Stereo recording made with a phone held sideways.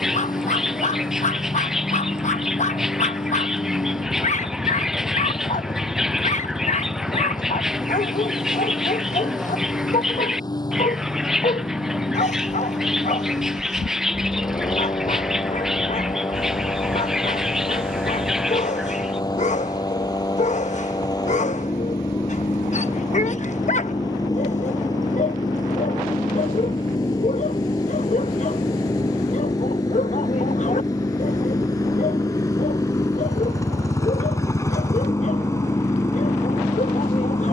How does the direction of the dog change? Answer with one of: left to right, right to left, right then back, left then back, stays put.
stays put.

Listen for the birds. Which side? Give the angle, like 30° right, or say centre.
centre.